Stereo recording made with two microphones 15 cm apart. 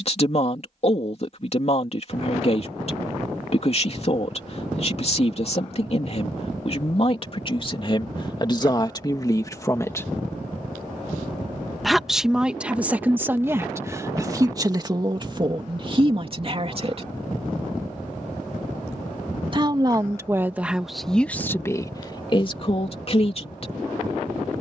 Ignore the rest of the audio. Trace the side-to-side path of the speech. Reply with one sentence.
In this clip you hear the speech go right and come back.